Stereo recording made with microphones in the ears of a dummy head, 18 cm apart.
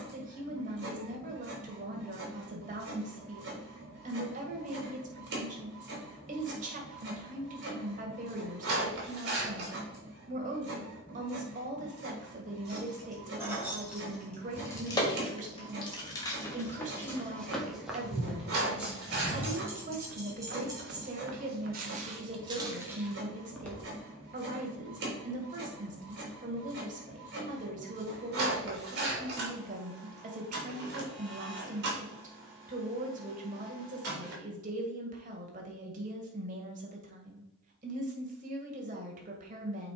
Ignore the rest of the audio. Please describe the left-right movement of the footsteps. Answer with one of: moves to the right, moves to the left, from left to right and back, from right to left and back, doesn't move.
from left to right and back.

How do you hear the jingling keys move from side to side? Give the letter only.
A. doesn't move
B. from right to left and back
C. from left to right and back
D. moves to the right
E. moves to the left
B.